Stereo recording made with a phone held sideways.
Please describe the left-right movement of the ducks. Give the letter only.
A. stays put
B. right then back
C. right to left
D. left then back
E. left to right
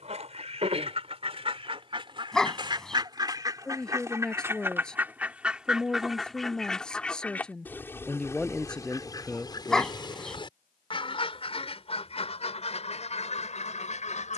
C.